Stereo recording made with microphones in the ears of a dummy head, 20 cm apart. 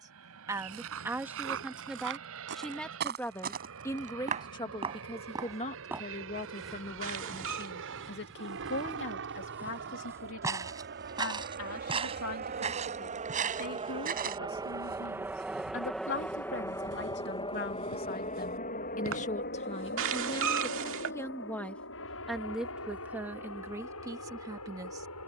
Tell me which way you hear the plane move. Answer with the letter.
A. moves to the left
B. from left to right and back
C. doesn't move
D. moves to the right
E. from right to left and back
A.